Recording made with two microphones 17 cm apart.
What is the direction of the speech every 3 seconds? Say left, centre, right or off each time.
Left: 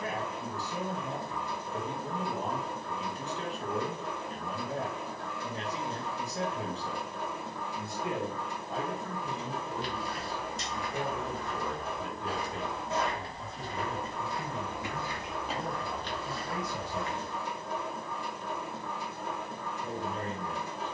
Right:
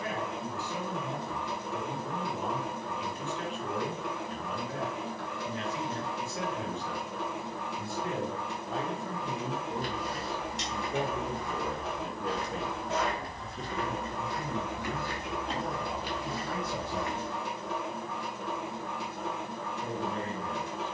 left, left, left, right, right, right, right.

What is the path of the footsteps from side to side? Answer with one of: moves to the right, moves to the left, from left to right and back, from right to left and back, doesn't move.
from right to left and back.